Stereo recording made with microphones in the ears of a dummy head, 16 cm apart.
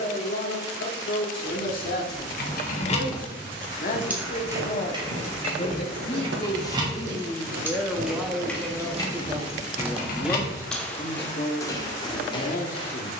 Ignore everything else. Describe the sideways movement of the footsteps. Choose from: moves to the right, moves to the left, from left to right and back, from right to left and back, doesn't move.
from left to right and back.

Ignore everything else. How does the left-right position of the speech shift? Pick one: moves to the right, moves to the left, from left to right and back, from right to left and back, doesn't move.
from left to right and back.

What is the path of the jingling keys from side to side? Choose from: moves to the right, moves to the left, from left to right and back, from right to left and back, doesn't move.
from left to right and back.